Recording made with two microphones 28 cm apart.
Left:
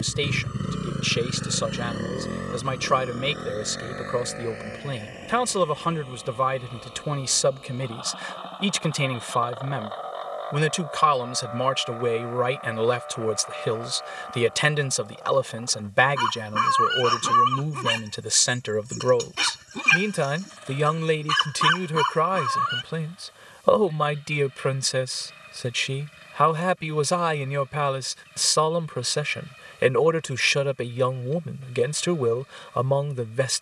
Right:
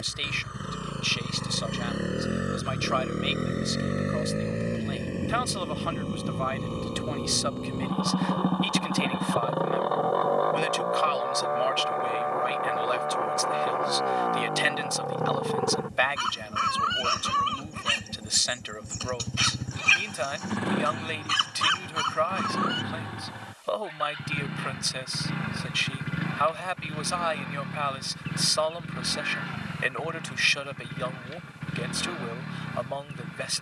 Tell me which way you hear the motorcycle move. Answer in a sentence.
In this clip you hear the motorcycle go from the left side to the right.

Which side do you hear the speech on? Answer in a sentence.
In this clip you hear the speech on the left.